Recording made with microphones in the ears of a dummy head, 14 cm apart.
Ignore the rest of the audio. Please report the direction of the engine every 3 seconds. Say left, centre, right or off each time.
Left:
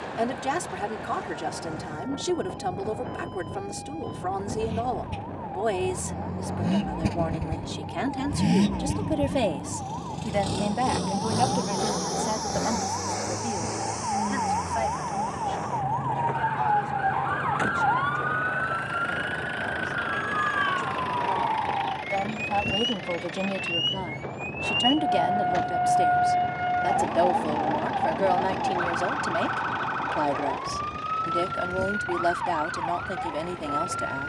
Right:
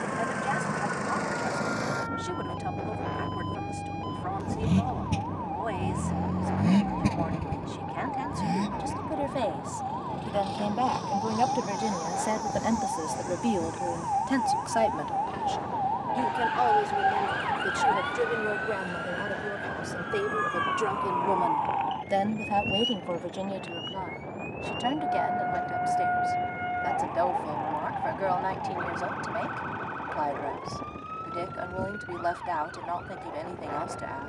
right, right, centre, left, left, left, left, left, left, left, left, left.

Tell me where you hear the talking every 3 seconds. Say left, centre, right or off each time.
left, left, left, centre, right, right, right, centre, left, left, left, left.